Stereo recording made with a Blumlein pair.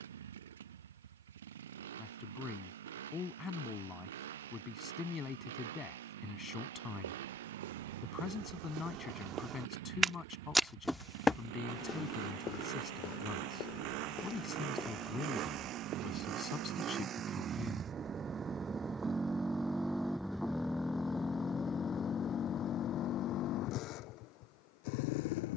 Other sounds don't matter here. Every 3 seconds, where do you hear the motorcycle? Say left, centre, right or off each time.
right, right, right, right, right, right, centre, left, left.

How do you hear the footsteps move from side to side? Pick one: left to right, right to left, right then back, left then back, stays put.
left then back.